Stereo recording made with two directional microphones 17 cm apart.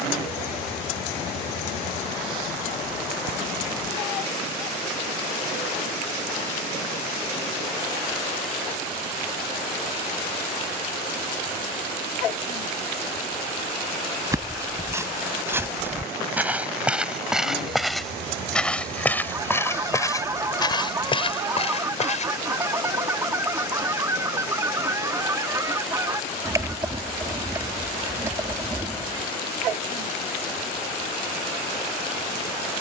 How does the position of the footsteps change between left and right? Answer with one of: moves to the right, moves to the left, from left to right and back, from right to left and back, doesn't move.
moves to the left.